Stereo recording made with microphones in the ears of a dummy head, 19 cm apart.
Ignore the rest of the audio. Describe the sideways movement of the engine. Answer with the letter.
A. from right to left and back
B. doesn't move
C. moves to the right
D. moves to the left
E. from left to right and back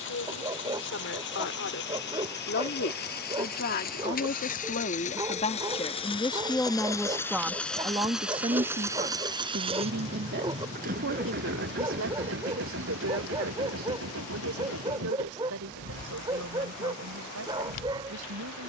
C.